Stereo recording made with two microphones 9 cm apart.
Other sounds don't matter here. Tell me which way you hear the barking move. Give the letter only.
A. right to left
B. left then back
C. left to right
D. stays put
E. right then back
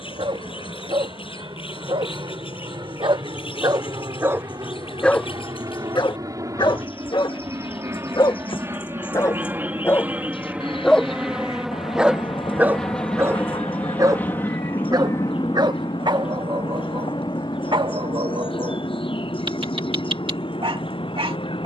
B.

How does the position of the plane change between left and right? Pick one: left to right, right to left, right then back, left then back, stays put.
right to left.